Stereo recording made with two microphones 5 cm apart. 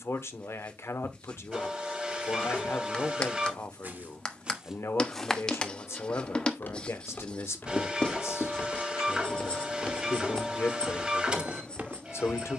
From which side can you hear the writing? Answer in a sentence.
You can hear the writing on the left.